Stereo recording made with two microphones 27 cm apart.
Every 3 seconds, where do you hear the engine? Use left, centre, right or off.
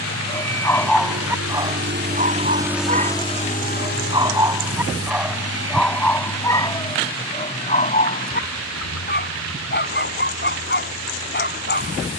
right, left, left, left.